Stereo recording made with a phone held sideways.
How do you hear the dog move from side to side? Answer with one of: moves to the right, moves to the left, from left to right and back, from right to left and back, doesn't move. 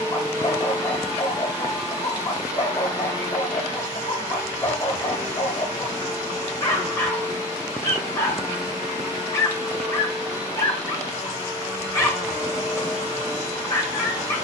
doesn't move.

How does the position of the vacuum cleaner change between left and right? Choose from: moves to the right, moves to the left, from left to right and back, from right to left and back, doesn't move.
doesn't move.